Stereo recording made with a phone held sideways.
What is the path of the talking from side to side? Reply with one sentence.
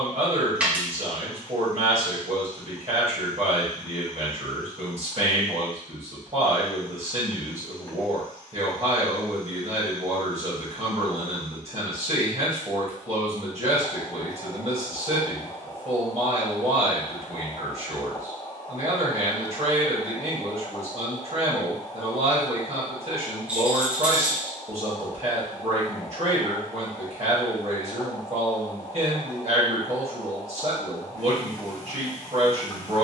You can hear the talking stay in one place.